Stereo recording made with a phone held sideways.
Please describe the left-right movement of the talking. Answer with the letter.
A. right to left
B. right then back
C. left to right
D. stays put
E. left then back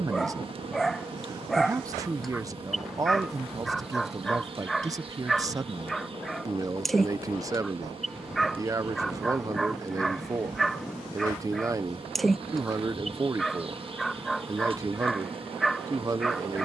D.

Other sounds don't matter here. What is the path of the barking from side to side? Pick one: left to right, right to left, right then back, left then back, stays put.
stays put.